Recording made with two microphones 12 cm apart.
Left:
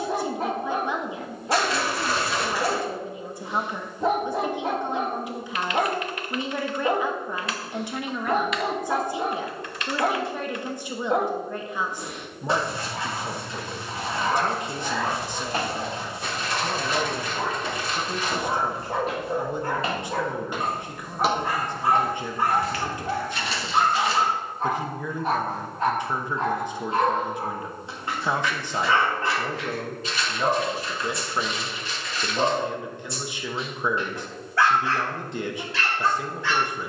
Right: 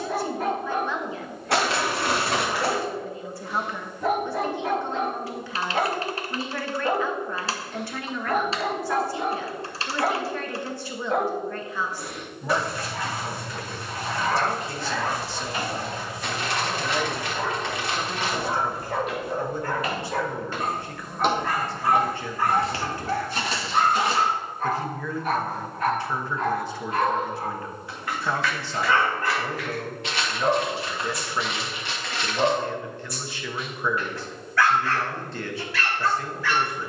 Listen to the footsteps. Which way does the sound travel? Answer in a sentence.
In this clip you hear the footsteps move to the right.